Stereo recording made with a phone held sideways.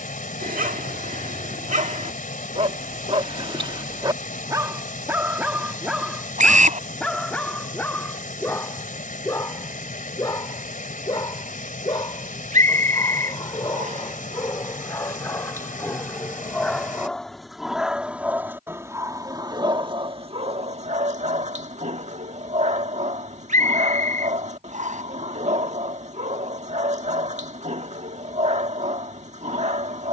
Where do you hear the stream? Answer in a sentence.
In this clip you hear the stream on the left.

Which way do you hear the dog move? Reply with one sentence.
In this clip you hear the dog go left and come back.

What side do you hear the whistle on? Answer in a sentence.
In this clip you hear the whistle on the right.